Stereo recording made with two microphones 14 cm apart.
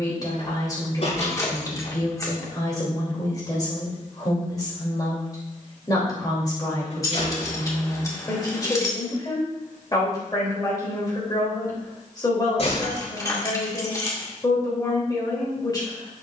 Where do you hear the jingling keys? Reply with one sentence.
You can hear the jingling keys on the left.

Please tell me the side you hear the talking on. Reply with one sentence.
In this clip you hear the talking on the left.